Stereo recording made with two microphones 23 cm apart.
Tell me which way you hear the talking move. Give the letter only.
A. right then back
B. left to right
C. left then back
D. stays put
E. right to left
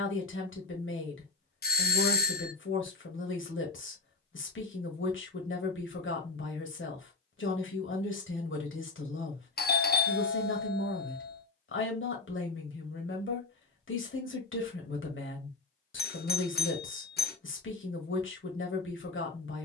D.